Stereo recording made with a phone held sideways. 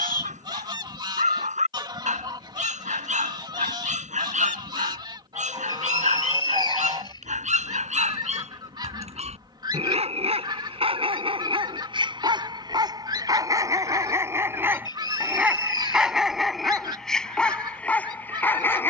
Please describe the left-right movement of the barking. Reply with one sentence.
In this clip you hear the barking move to the left.